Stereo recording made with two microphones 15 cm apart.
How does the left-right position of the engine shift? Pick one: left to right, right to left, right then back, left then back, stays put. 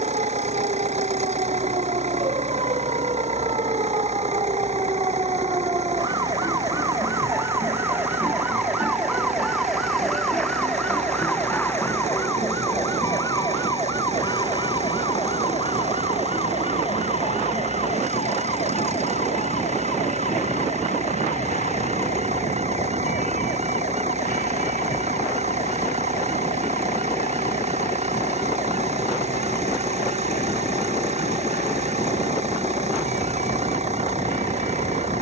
stays put.